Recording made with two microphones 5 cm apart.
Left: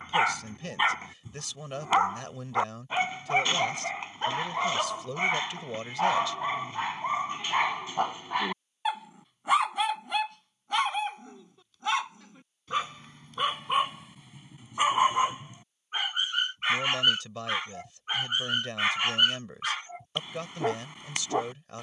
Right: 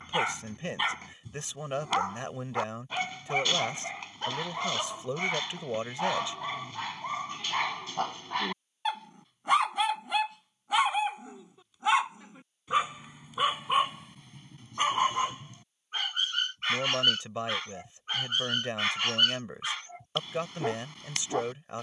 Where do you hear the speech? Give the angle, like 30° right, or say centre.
20° right.